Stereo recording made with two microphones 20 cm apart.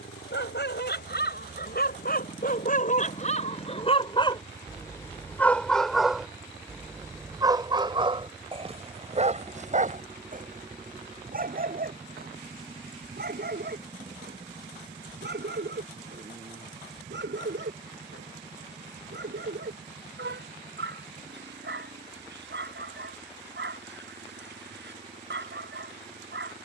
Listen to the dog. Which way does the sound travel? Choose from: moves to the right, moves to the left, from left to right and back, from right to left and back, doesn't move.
moves to the right.